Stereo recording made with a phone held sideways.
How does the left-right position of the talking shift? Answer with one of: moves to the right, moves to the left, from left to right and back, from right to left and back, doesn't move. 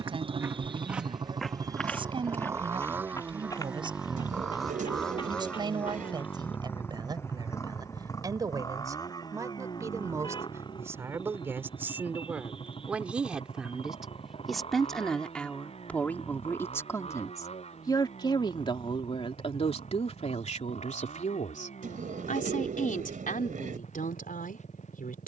moves to the left.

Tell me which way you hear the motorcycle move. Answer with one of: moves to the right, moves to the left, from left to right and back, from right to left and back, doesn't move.
moves to the left.